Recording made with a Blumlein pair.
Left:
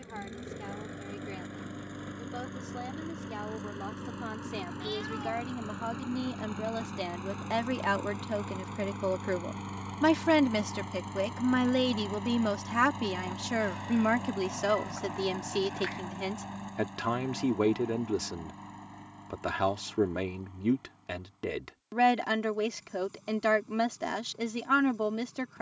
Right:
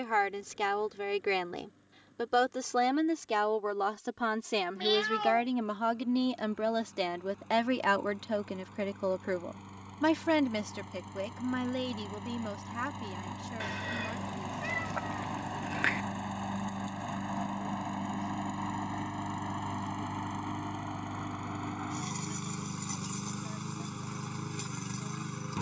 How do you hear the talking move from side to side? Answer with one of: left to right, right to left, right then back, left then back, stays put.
right to left.